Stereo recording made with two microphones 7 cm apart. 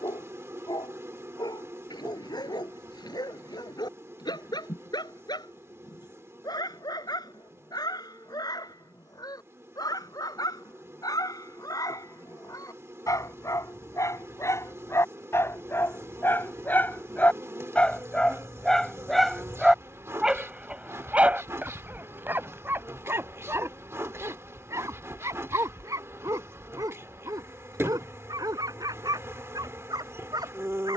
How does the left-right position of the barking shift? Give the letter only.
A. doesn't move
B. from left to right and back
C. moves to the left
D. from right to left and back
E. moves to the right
E.